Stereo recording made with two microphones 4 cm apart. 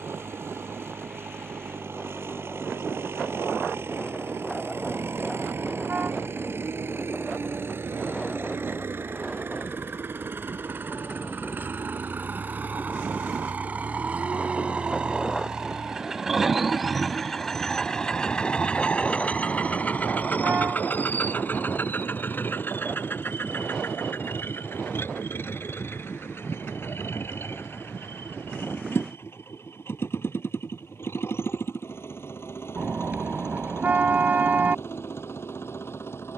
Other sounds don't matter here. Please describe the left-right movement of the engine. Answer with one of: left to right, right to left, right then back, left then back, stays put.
right to left.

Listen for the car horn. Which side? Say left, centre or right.
right.